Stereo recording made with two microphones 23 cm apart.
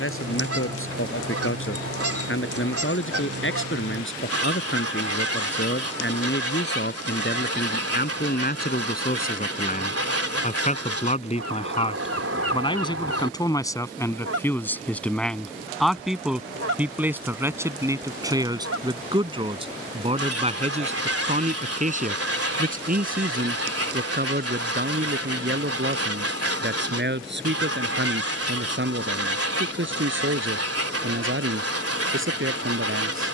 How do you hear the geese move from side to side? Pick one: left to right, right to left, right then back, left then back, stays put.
stays put.